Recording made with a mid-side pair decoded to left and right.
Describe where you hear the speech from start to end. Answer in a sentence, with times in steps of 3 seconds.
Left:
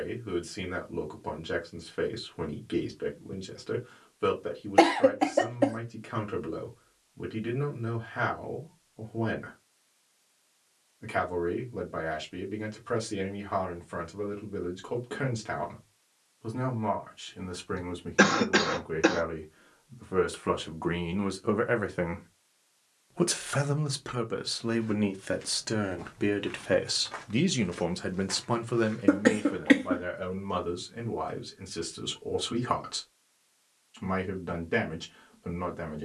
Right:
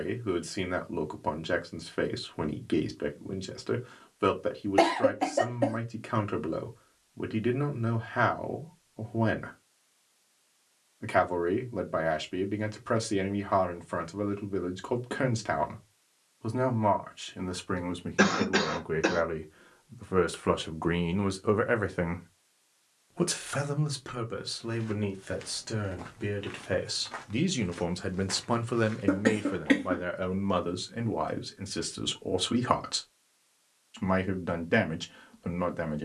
In this clip you hear the speech on the right from 0 s, in the centre from 21 s, on the left from 24 s, in the centre from 27 s and on the right from 30 s.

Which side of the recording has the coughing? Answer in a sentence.
You can hear the coughing on the left.